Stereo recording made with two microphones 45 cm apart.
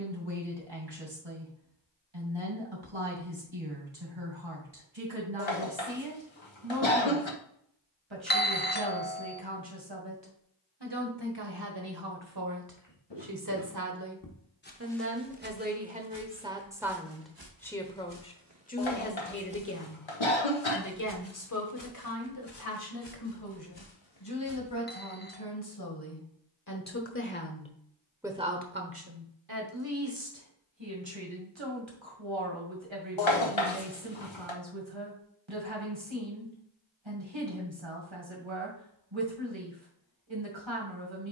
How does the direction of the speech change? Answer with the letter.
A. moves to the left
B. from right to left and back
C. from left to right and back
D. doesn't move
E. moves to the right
B.